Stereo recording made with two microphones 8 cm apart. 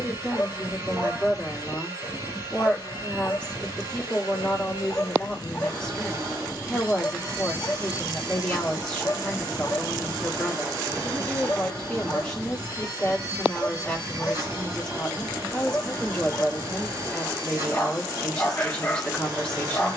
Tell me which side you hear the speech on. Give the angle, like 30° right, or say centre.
10° left.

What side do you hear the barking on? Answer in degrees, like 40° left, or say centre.
20° left.